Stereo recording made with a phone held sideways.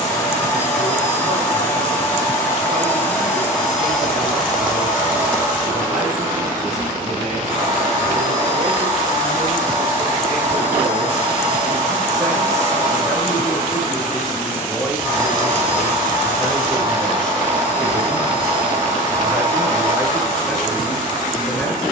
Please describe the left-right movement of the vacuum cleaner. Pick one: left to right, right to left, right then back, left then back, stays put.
left to right.